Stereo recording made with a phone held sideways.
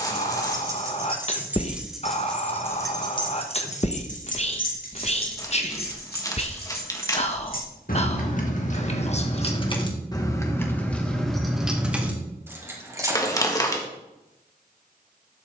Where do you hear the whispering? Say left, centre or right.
left.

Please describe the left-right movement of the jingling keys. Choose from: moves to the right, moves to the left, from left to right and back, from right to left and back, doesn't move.
from right to left and back.